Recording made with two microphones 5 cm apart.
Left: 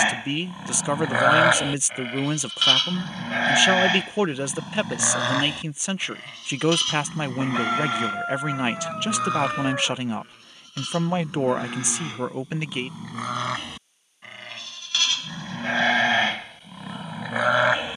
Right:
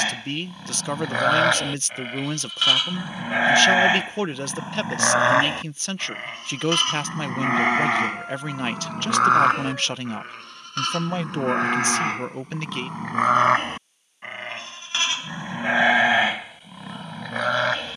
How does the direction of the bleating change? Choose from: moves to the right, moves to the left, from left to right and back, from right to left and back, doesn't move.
from left to right and back.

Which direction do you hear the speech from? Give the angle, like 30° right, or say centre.
10° left.